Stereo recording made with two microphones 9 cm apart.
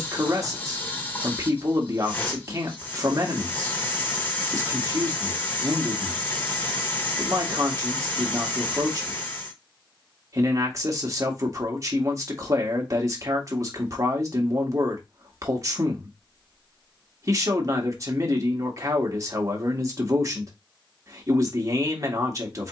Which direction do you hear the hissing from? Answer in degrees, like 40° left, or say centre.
20° left.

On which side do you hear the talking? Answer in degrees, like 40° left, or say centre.
40° right.